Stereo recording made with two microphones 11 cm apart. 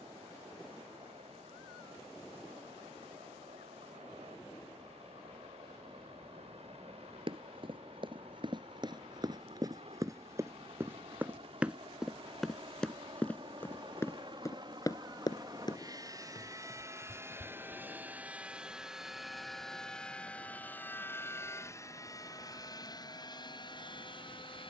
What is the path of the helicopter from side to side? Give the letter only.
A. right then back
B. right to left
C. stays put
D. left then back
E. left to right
B.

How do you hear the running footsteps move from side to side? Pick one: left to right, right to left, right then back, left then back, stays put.
right to left.